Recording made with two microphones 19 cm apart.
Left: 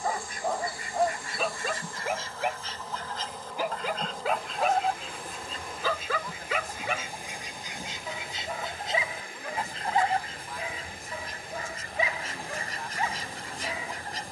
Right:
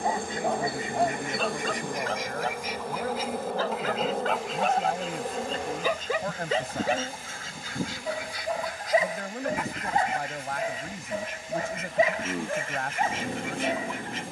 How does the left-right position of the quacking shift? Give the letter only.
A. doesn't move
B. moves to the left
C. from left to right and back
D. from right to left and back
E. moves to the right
B.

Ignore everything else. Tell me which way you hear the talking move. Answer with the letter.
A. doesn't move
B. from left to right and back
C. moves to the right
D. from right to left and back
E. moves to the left
A.